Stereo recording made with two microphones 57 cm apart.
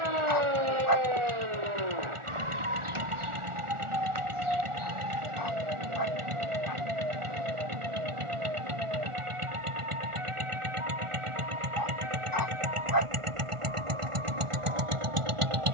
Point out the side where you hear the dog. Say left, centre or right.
left.